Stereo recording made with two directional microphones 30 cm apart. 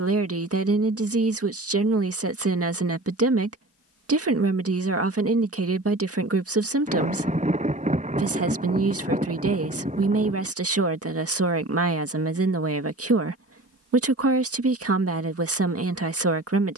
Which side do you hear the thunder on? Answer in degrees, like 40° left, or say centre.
20° right.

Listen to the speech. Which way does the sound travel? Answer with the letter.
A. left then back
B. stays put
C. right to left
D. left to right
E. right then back
B.